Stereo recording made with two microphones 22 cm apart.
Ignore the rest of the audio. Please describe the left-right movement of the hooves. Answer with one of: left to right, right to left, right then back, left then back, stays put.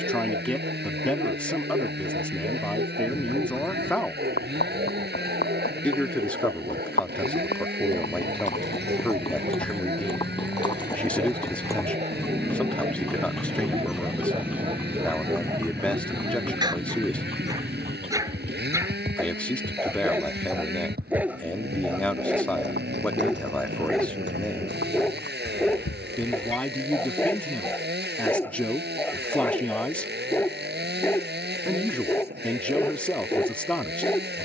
left to right.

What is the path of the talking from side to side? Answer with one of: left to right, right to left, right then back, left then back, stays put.
stays put.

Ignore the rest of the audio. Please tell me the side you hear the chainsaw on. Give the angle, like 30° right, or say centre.
50° right.